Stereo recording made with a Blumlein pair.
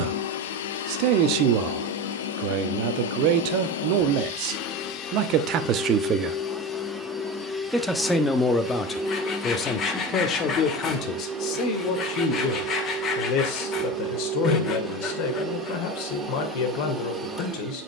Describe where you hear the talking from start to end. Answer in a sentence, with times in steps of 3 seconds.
You can hear the talking on the right from 0 s, in the centre from 6 s and on the left from 9 s.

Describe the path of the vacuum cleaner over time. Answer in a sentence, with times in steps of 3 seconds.
In this clip you hear the vacuum cleaner on the left from 0 s and in the centre from 6 s.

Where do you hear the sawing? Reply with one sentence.
You can hear the sawing on the left.